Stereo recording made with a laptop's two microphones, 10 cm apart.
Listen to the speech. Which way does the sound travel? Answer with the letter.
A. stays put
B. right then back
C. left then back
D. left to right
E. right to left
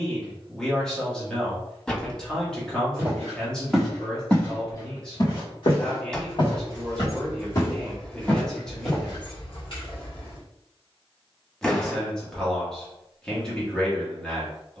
A.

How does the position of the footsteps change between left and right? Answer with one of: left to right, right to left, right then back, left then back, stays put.
left then back.